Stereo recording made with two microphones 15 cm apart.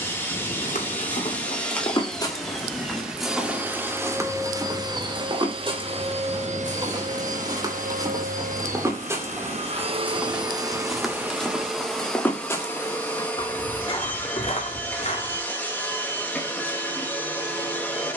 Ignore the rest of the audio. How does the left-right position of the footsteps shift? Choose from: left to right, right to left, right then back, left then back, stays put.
right then back.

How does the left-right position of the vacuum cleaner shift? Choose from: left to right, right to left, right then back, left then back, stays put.
right then back.